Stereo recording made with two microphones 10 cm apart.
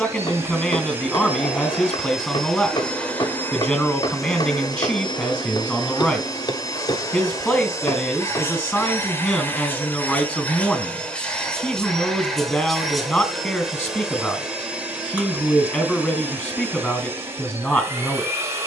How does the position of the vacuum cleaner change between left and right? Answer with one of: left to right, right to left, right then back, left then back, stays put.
left then back.